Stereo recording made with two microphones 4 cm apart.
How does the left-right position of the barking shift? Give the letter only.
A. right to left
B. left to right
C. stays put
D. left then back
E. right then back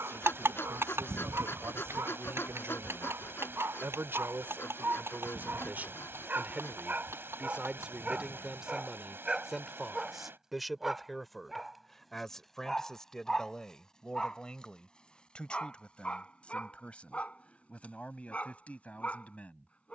A.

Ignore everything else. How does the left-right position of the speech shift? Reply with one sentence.
In this clip you hear the speech move from right to left.